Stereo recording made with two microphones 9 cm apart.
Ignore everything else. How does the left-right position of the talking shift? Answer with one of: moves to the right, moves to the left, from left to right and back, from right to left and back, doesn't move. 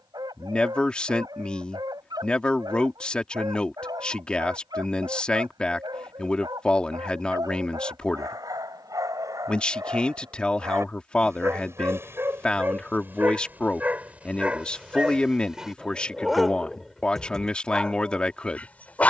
doesn't move.